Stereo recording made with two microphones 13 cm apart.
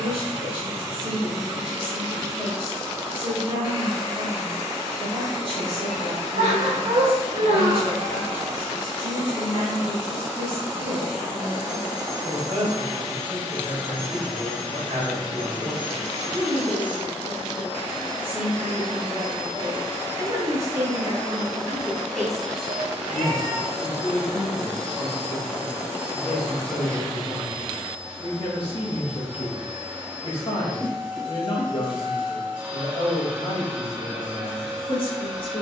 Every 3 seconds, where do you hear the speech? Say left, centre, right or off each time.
right, right, right, right, right, right, right, centre, left, left, left, left.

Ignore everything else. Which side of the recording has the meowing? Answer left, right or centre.
right.